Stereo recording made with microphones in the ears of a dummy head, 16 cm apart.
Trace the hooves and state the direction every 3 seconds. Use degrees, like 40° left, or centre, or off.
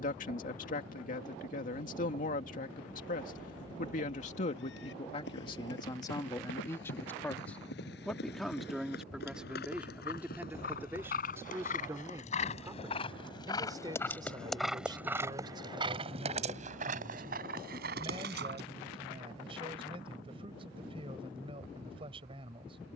off, 70° left, 70° left, 50° left, 20° left, 40° right, 60° right, off.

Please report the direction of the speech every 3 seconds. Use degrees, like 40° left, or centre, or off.
50° left, 40° left, 10° left, 10° right, 20° right, 30° right, 30° right, 30° right.